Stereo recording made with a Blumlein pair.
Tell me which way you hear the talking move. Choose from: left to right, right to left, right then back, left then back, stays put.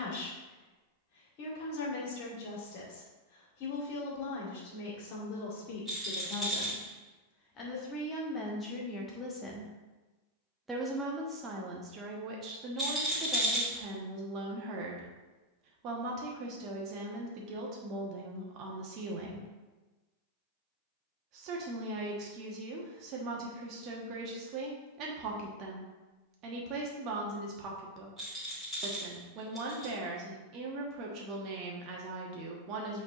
left to right.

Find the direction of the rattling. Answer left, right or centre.
centre.